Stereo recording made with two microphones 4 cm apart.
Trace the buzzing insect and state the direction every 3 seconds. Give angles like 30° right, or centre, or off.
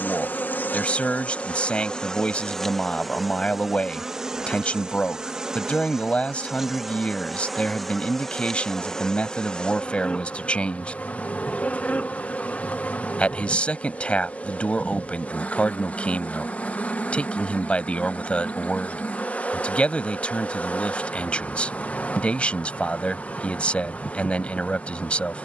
30° left, 20° right, centre, 30° left, 30° left, 30° left, 30° left, 30° left, 30° left.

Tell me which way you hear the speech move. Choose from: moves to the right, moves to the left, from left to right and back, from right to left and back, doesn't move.
doesn't move.